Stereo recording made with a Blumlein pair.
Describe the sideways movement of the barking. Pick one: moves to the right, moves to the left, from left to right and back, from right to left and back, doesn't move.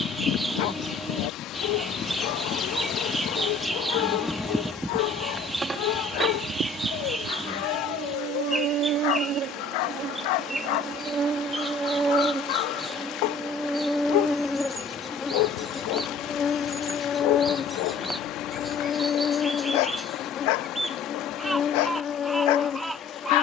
doesn't move.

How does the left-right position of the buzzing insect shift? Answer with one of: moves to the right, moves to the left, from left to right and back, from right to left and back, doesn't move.
from left to right and back.